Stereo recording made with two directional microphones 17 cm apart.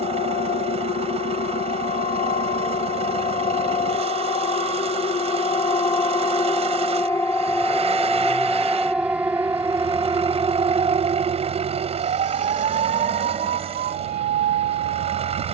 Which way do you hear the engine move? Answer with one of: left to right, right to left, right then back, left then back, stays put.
stays put.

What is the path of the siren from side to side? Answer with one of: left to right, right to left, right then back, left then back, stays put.
left to right.